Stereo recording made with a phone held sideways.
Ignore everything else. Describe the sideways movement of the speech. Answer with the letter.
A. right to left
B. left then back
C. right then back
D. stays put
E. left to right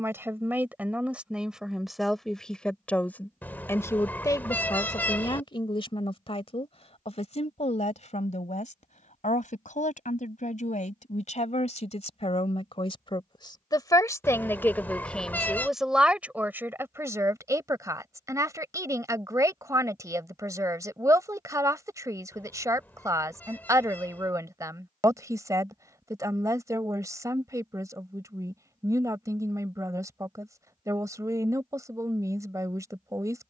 B.